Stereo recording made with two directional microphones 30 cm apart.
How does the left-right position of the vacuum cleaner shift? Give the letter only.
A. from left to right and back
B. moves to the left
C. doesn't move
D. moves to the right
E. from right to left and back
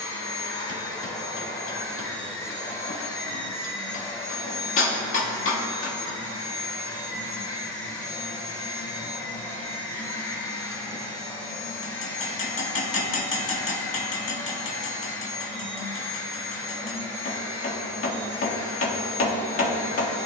C.